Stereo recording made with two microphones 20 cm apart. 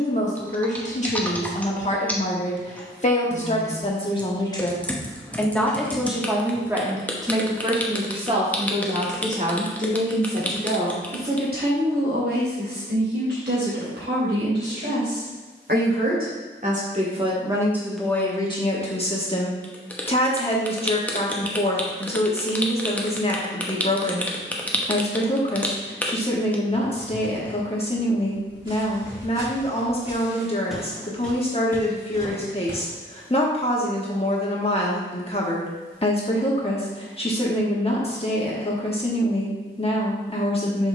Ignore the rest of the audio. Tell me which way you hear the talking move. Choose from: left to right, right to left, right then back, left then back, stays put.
right then back.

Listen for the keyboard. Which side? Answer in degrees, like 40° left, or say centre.
10° left.